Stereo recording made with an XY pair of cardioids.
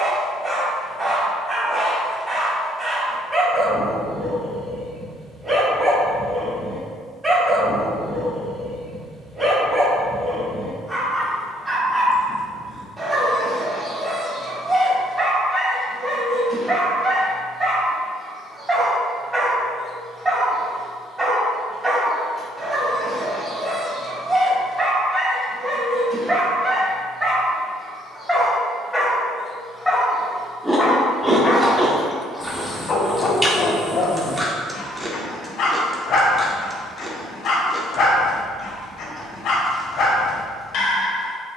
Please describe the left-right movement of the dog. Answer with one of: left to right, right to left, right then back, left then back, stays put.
right to left.